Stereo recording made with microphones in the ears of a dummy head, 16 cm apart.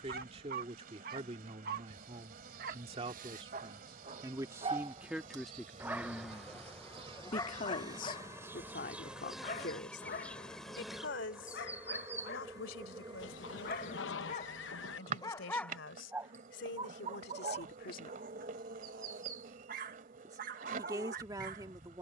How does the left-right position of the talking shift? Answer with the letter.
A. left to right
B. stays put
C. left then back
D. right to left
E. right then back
C.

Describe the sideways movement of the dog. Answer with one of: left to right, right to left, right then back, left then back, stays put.
left then back.